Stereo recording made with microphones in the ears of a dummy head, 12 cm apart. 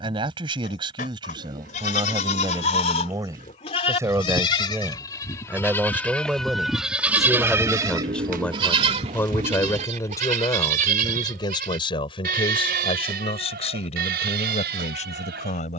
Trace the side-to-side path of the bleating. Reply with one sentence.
In this clip you hear the bleating go from the left side to the right.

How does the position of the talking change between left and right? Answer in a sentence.
You can hear the talking go from the right side to the left.